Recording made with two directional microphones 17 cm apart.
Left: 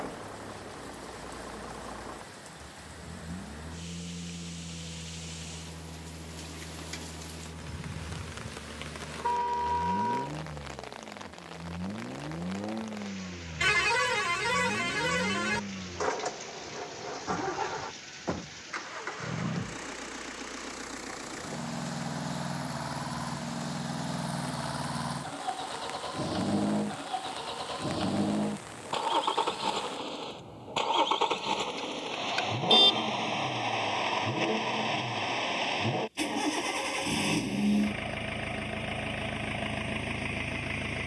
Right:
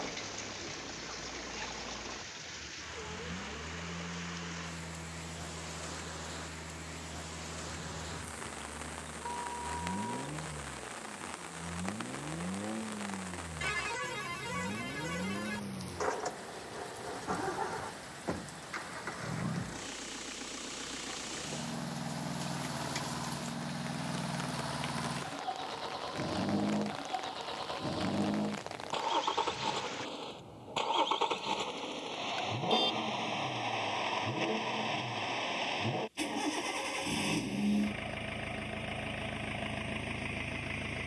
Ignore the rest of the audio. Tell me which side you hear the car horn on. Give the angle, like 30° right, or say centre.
60° left.